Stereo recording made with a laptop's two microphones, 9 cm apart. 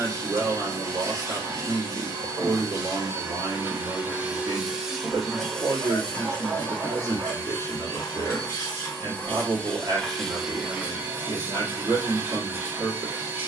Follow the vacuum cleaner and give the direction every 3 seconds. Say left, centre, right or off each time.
right, centre, left, centre, right.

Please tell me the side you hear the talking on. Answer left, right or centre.
right.